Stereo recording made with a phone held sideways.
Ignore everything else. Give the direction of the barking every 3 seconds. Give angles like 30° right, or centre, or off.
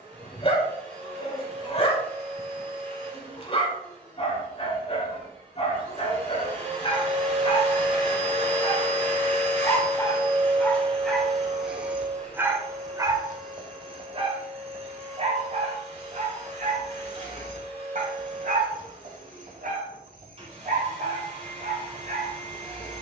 30° left, 30° left, 30° left, 10° left, 30° right, 50° right, 60° right, 60° right.